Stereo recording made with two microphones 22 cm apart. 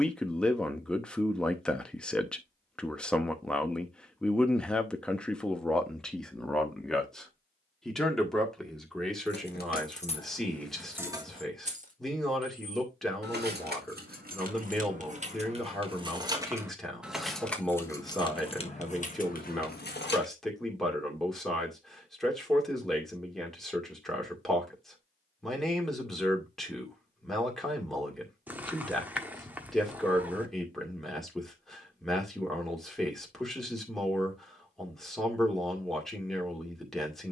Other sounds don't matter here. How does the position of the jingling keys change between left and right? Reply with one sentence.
In this clip you hear the jingling keys go right and come back.